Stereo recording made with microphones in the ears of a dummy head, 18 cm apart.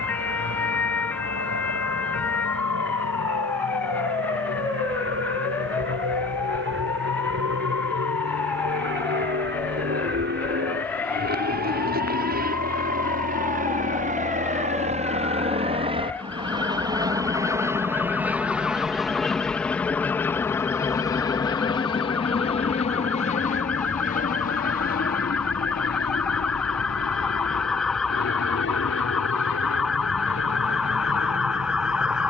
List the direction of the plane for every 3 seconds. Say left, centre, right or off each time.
right, right, right, right, right, right, centre, left, left, left, left.